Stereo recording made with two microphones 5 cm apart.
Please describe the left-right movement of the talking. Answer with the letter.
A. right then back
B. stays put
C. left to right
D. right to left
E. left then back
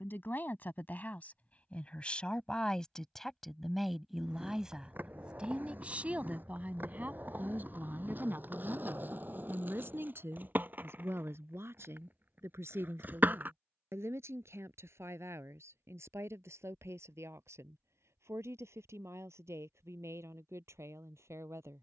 C.